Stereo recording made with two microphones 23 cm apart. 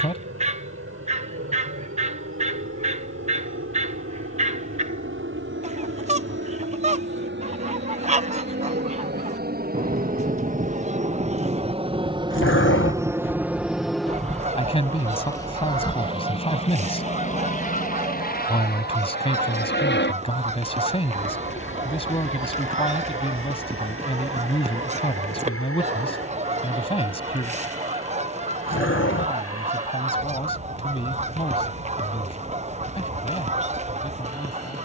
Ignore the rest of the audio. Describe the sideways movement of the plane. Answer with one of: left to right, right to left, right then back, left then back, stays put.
right to left.